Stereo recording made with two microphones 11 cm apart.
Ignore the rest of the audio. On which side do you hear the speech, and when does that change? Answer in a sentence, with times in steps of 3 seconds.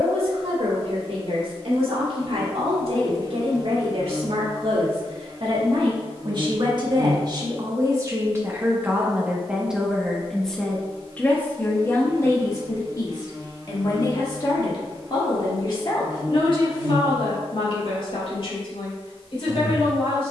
You can hear the speech on the right from 0 s, in the centre from 9 s and on the left from 12 s.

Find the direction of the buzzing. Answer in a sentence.
You can hear the buzzing on the right.